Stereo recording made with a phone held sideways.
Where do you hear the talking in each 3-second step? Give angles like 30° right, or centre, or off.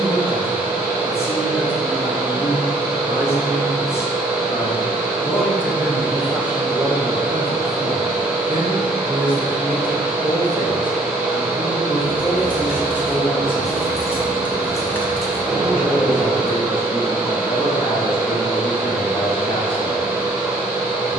40° left, 30° left, 20° right, 20° left, 40° left, 40° left, 40° left.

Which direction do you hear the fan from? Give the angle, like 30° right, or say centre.
10° right.